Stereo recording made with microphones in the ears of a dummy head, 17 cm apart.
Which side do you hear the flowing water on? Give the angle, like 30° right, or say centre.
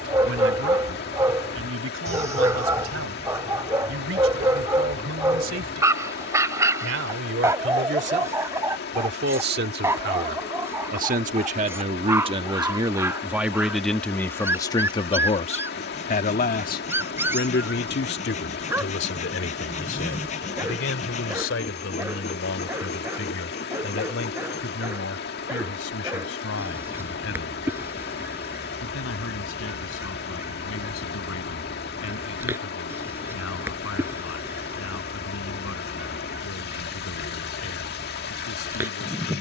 60° left.